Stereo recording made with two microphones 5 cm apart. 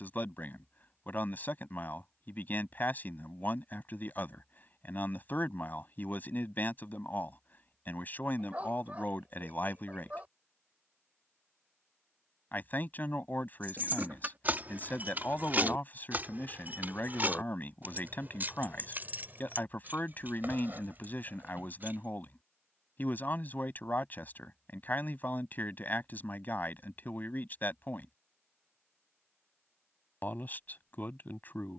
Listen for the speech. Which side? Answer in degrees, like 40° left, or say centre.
40° left.